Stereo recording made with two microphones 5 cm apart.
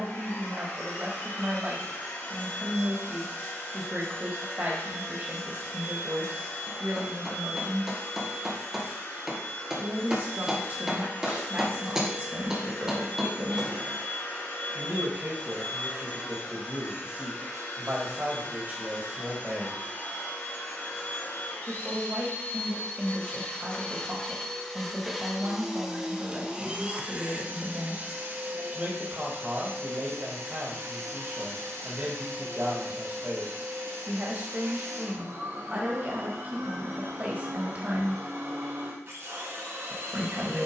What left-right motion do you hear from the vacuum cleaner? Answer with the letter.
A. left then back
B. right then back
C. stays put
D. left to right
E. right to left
D.